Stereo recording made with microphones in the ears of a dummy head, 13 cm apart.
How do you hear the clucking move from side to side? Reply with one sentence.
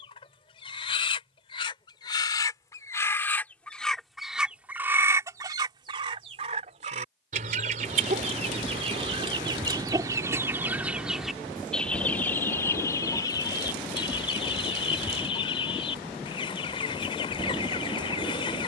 In this clip you hear the clucking go right and come back.